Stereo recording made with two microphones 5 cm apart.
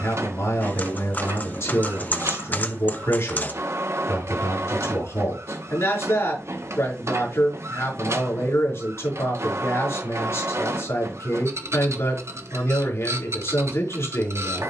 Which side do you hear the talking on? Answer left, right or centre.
left.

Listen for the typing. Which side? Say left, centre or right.
left.